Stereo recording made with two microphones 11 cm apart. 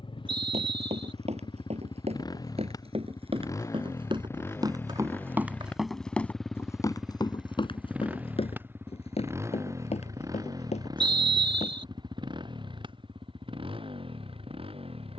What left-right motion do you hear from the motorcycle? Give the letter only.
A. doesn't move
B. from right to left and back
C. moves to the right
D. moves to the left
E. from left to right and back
C.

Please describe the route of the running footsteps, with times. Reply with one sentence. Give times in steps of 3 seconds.
You can hear the running footsteps on the right from 0 s, on the left from 6 s and not at all from 12 s.